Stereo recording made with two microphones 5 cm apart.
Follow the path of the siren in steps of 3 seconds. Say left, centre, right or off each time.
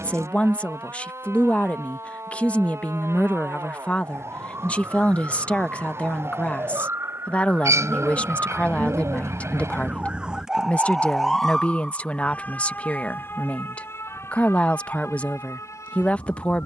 right, right, right, centre, left, left.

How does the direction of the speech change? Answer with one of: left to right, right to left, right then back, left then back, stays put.
stays put.